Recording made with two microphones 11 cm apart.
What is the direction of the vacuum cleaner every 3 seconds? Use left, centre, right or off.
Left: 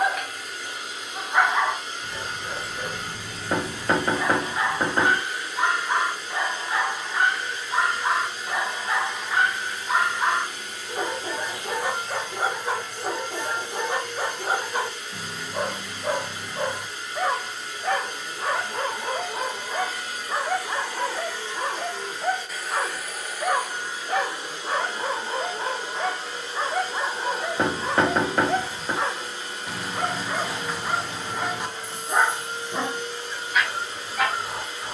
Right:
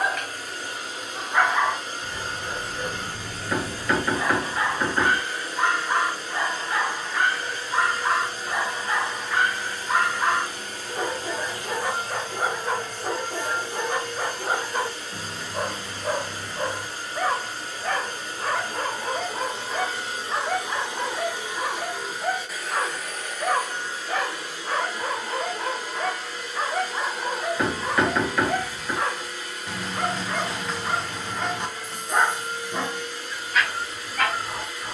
right, right, right, right, right, right, right, centre, left, left, left, left.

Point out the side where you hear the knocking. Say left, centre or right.
left.